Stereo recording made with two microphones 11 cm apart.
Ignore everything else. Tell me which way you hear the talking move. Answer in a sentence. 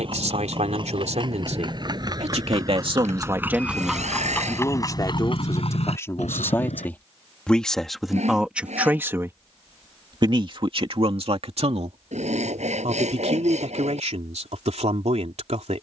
You can hear the talking move from right to left and back again.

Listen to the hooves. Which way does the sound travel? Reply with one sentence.
In this clip you hear the hooves move from right to left.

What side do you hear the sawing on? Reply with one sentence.
You can hear the sawing on the right.